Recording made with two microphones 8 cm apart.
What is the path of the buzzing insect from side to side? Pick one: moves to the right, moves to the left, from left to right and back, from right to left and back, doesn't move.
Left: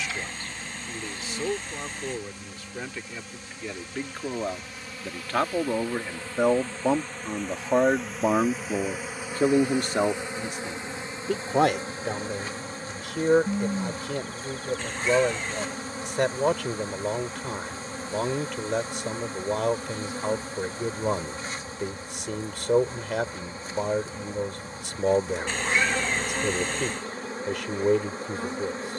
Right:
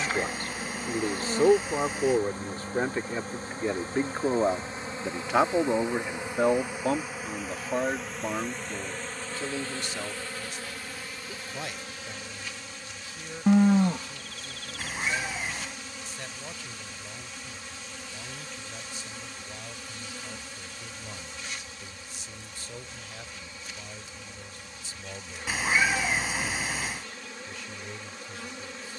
moves to the left.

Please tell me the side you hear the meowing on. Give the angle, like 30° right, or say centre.
10° right.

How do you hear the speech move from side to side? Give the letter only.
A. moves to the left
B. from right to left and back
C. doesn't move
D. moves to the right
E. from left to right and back
A.